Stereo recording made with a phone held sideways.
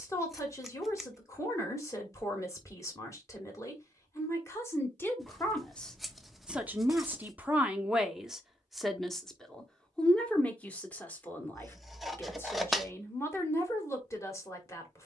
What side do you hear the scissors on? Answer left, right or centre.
centre.